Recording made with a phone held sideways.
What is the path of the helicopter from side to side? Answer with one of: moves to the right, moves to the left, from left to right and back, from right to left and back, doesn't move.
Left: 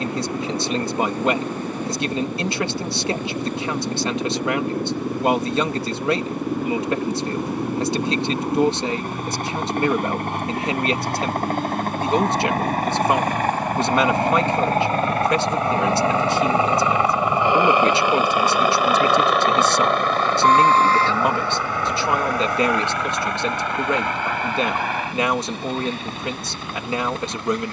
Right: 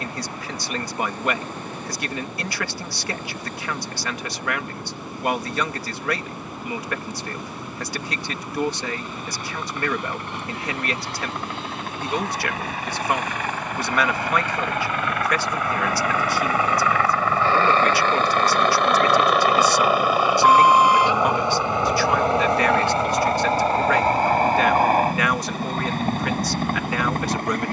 moves to the right.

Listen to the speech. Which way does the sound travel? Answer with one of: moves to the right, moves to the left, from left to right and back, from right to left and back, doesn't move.
doesn't move.